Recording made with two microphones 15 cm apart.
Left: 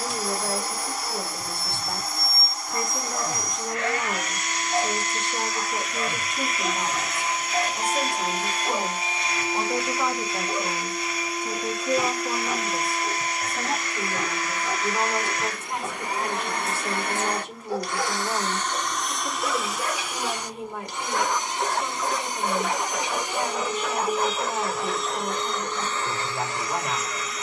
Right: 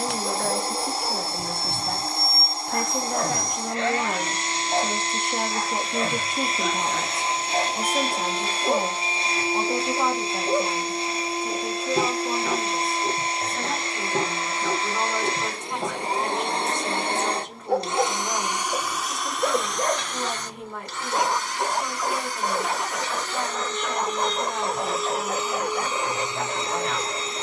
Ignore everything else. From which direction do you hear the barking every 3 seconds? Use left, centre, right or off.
right, right, right, right, right, right, right, centre, right.